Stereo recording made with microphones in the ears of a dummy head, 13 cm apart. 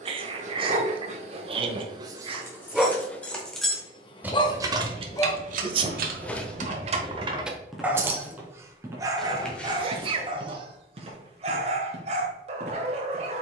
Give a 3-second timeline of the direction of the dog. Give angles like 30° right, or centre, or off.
30° right, 20° left, centre, 30° right, 40° right.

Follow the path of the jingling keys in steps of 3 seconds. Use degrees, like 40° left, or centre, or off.
10° left, 30° right, 40° right, 10° left, off.